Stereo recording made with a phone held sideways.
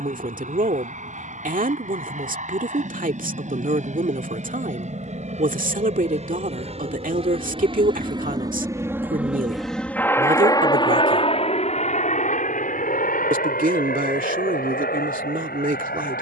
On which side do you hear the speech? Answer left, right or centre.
right.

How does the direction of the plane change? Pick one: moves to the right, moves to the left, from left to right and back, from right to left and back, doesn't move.
moves to the left.